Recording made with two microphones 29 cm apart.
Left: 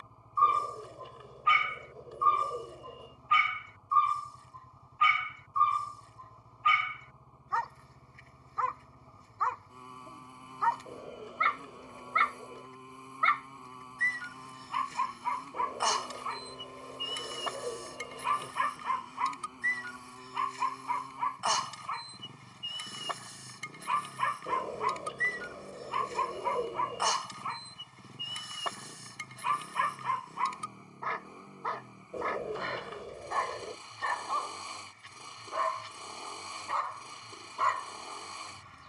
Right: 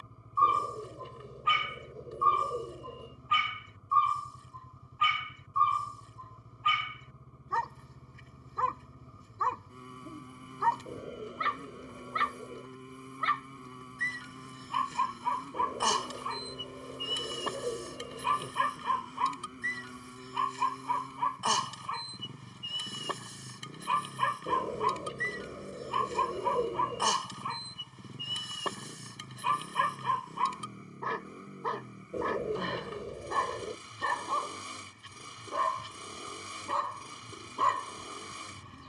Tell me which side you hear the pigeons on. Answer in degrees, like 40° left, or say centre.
30° right.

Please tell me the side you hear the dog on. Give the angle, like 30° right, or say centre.
40° right.